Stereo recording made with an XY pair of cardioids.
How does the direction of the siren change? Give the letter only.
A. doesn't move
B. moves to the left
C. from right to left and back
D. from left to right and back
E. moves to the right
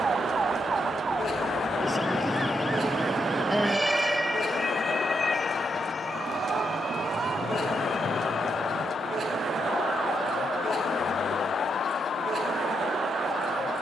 B.